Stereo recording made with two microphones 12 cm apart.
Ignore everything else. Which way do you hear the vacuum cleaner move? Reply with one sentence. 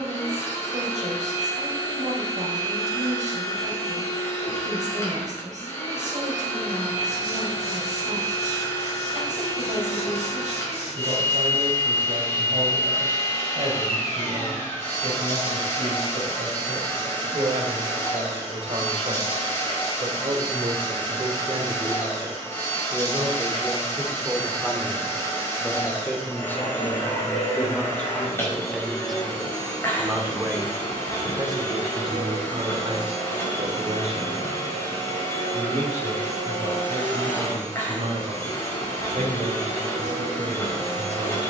In this clip you hear the vacuum cleaner stay in one place.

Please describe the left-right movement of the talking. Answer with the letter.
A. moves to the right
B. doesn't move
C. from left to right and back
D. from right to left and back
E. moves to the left
D.